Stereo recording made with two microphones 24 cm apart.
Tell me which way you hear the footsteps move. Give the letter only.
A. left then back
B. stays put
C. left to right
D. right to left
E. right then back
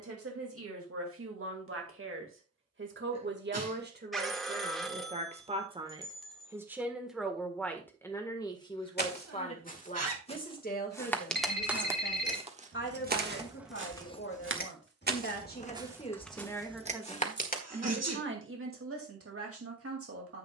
E.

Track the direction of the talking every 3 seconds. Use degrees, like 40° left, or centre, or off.
60° right, 30° right, 10° left, 30° left, 50° left, 10° left, 60° right.